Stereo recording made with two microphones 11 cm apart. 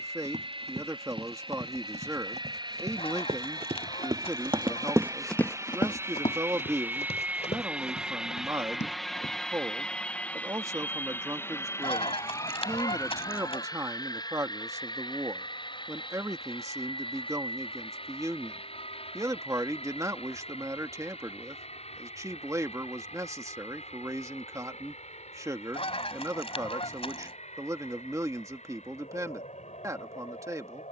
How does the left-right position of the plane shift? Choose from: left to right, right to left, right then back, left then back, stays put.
right to left.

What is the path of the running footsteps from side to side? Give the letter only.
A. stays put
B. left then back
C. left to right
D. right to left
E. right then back
D.